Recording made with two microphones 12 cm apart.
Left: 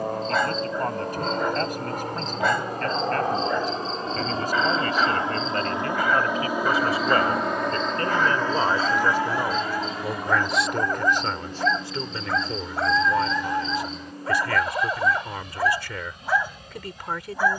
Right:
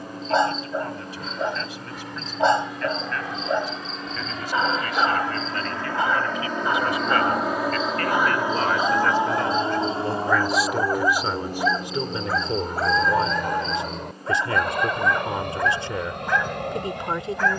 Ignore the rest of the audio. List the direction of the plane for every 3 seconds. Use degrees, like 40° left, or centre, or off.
50° left, 30° left, centre, 30° right, 50° right, 60° right.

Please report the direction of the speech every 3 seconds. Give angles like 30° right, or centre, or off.
50° left, 40° left, 30° left, centre, 20° right, 20° right.